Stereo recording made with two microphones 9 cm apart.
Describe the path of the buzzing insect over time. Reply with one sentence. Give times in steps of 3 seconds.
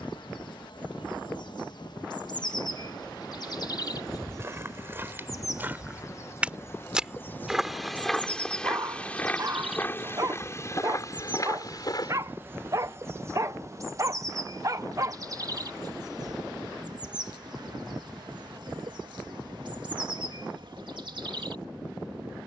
In this clip you hear the buzzing insect on the left from 0 s, in the centre from 9 s and on the right from 12 s.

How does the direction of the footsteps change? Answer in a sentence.
You can hear the footsteps move to the left.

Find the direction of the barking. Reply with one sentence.
You can hear the barking on the right.